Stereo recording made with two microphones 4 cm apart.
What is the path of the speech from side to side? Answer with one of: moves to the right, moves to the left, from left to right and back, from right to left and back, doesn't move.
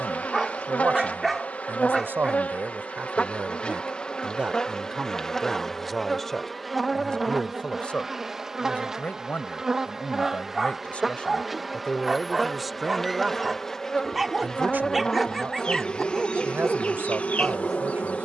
from right to left and back.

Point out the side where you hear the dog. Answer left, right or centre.
centre.